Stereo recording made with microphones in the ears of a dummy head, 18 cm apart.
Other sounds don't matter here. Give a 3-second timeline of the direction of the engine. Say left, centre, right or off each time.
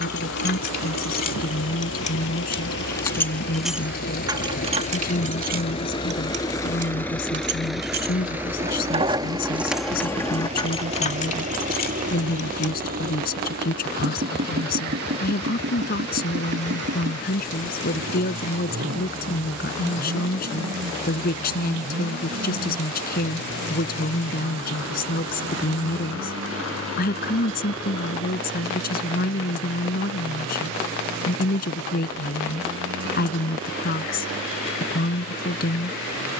left, left, centre, right, right, right, right, right, right, right, right, right.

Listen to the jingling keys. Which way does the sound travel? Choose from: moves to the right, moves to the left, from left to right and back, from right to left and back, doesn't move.
from left to right and back.